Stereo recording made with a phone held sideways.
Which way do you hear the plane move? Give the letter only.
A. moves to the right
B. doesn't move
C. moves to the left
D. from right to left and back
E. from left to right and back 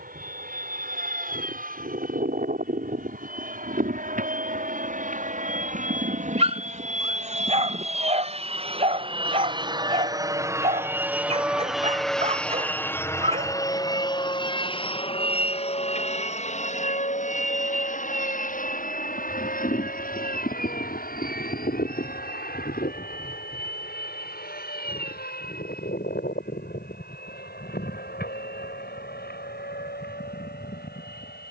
C.